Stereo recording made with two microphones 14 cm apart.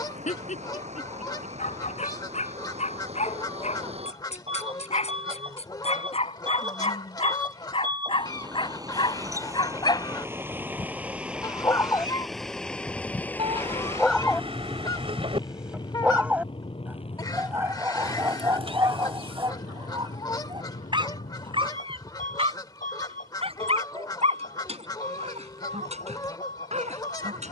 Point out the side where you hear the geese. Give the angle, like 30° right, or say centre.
30° left.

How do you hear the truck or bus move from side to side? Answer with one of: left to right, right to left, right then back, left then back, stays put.
right to left.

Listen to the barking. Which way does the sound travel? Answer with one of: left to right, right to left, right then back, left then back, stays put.
left to right.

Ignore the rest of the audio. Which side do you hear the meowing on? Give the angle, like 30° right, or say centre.
40° right.